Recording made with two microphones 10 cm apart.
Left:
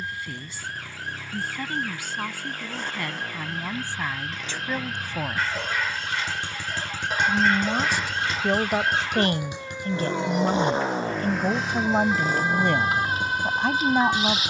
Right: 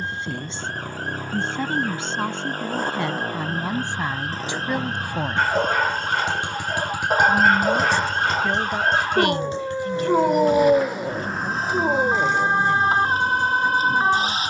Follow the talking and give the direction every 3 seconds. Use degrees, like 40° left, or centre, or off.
20° right, 20° right, 20° left, 50° left, 70° left.